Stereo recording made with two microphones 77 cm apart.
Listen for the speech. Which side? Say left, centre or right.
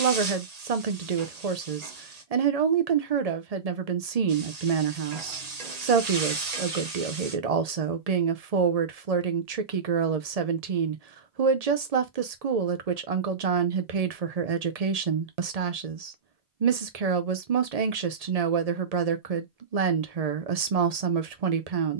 right.